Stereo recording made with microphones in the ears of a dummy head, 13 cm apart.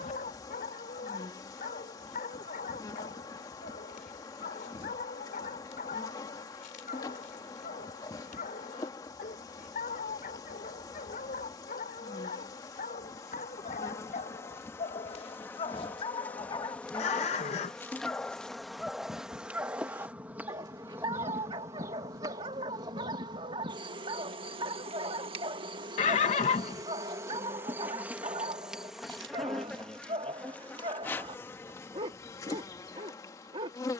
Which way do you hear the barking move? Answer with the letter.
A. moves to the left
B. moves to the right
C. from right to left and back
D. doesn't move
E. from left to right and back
B.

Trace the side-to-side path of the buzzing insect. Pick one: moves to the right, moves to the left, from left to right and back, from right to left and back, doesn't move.
from left to right and back.